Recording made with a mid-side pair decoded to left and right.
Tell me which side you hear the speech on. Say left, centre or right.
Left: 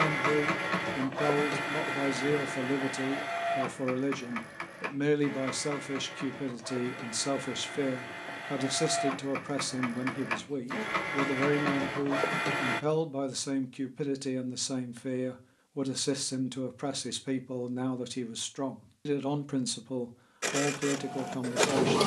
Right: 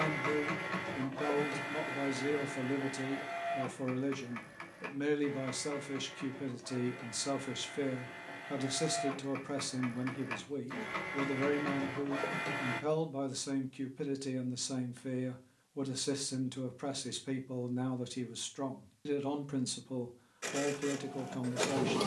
left.